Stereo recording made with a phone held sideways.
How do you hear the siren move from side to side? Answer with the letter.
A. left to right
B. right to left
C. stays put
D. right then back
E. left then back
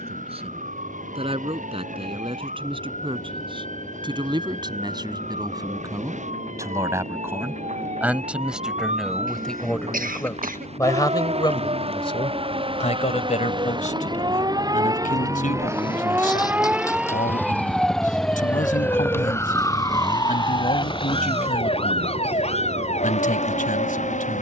B.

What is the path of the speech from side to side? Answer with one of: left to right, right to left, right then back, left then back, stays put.
right to left.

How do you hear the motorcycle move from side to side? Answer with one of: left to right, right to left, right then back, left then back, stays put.
left to right.